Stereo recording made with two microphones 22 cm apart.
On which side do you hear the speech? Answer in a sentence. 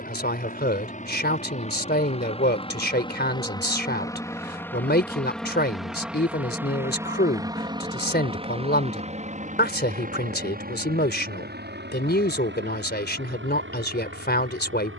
You can hear the speech on the left.